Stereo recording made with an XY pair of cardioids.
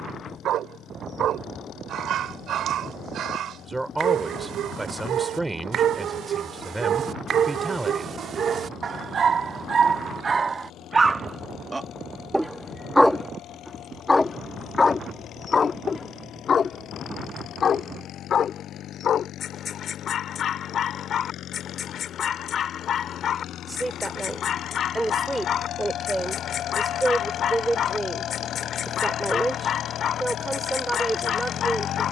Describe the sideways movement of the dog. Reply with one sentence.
You can hear the dog go from the right side to the left.